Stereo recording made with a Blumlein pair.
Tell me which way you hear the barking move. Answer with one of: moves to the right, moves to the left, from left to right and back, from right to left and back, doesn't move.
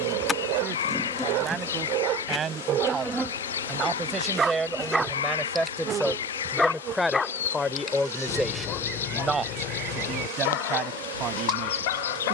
moves to the left.